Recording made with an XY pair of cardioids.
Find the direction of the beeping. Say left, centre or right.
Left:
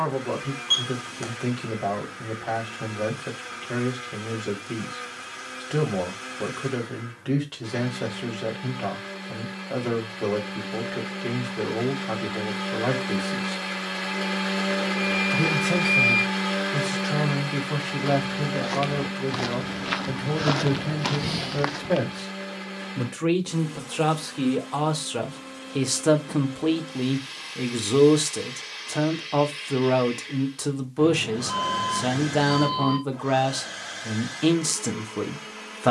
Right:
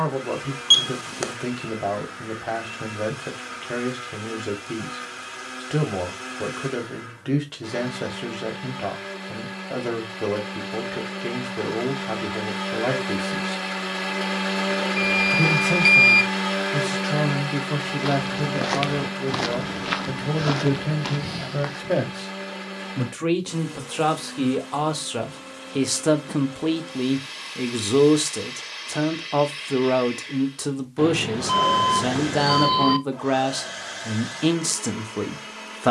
right.